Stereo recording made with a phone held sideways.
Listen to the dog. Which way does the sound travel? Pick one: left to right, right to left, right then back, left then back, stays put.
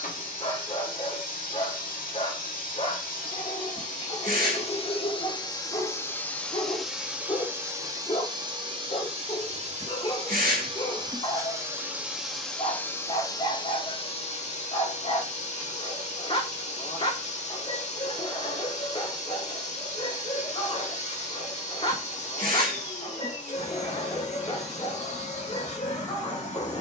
stays put.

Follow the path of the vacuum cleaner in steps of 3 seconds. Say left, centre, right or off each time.
left, left, centre, right, left, left, left, left, left.